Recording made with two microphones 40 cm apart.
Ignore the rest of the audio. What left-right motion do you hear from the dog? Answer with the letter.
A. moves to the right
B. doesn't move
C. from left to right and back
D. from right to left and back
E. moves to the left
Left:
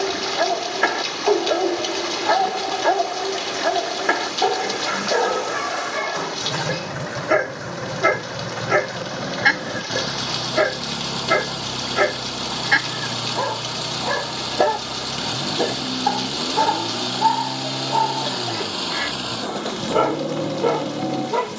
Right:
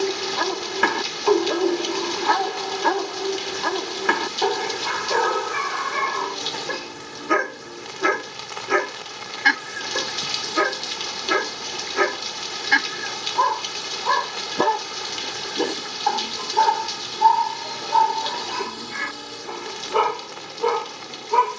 B.